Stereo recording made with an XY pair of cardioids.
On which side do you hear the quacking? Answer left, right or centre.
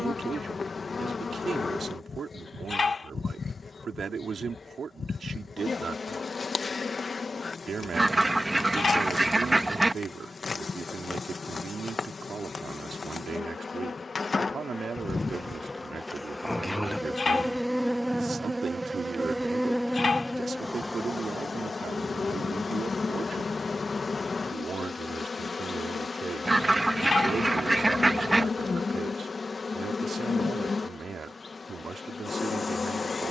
centre.